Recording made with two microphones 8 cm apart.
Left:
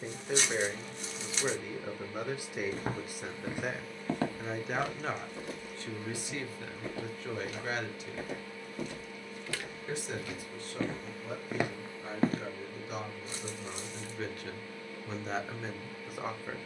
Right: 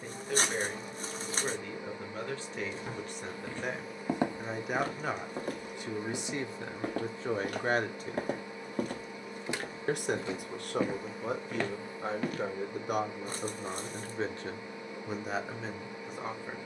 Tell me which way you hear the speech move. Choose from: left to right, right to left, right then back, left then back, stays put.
right then back.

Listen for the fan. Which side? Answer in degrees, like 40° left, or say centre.
20° right.